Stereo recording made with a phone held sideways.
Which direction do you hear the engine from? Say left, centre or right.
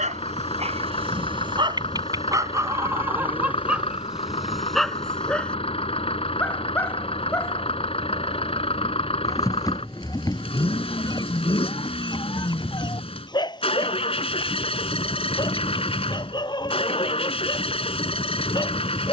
left.